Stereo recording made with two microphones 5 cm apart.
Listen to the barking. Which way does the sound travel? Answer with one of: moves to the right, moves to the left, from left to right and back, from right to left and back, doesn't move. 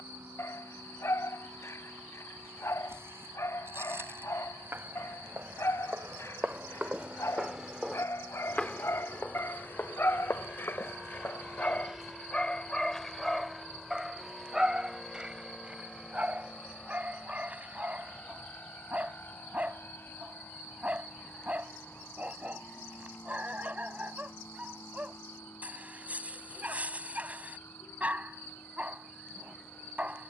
moves to the right.